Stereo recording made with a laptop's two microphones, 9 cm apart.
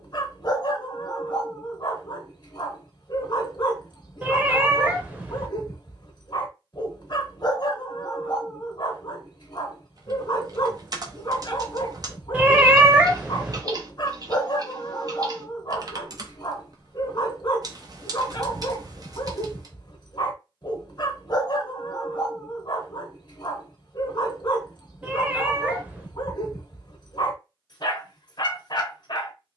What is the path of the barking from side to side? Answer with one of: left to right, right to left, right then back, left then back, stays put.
stays put.